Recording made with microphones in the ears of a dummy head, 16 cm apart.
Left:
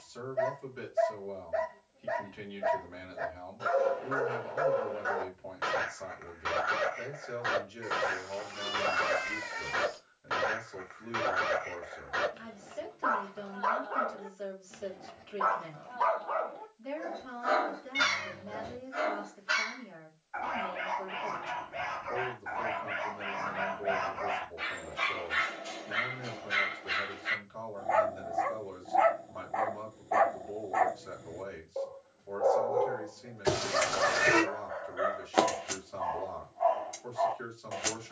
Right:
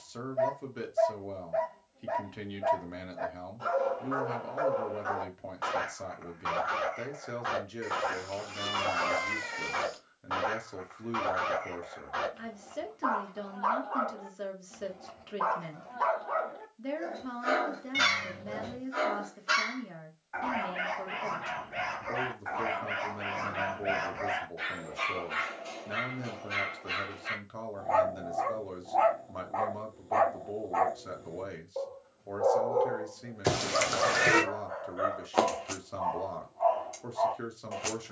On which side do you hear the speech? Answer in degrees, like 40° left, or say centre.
60° right.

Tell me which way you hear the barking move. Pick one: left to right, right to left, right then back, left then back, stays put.
right then back.